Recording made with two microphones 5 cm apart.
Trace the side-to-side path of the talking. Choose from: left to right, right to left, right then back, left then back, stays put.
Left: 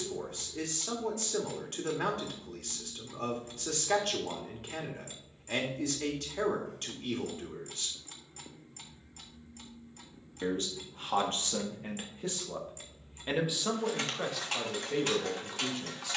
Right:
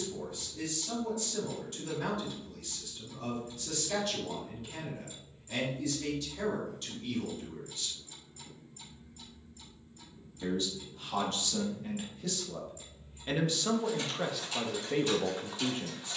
left to right.